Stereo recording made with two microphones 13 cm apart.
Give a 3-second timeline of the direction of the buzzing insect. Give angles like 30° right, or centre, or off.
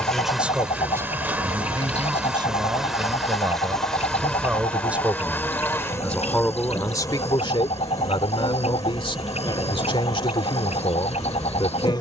10° right, 10° left, 30° left, 30° left.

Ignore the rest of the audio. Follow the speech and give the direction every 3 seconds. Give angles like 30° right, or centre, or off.
20° right, 20° right, 30° left, 40° left.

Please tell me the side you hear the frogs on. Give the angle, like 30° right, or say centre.
50° left.